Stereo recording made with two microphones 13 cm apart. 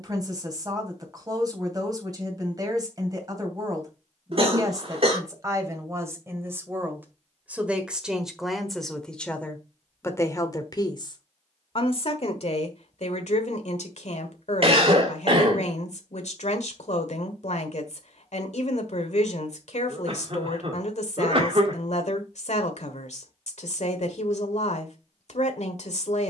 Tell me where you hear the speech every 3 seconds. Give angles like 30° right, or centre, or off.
30° right, 30° right, 10° right, 30° left, 60° left, 70° left, 70° left, 70° left, 70° left.